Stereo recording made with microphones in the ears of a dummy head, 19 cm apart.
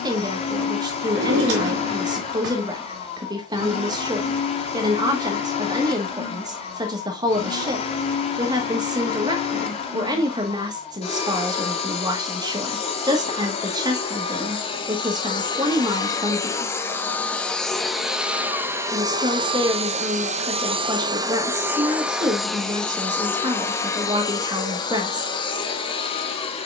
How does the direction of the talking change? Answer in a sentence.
In this clip you hear the talking stay put.